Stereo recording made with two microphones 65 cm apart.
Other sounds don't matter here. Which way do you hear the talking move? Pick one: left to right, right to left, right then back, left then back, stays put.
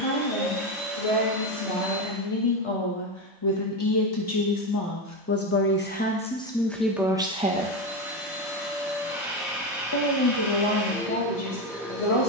right then back.